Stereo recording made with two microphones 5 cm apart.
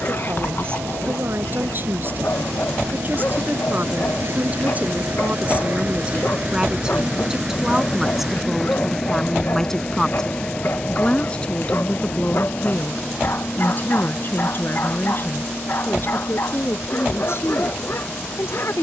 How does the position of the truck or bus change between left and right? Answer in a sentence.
In this clip you hear the truck or bus move from right to left.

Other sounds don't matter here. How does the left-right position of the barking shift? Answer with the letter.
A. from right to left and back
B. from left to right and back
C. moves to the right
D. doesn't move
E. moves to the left
D.